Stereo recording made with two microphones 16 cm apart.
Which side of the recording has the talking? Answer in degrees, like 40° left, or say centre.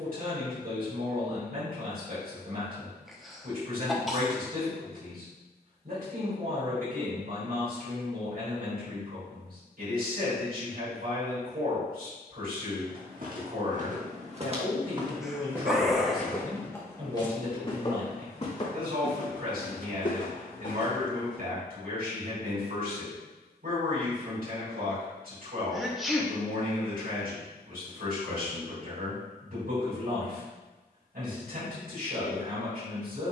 70° right.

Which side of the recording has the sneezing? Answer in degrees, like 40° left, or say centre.
centre.